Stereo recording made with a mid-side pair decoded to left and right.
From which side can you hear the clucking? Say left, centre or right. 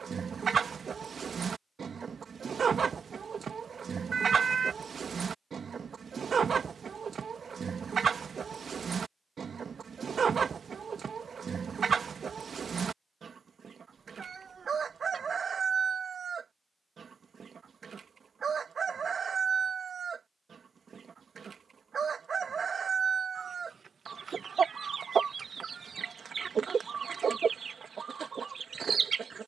right.